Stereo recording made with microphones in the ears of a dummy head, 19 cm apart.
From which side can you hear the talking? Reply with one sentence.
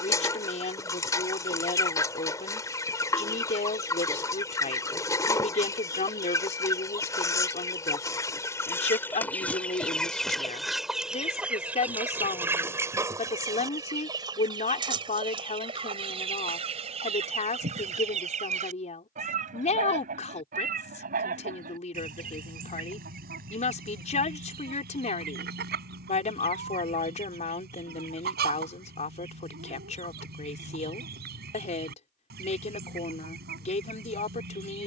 In this clip you hear the talking on the left.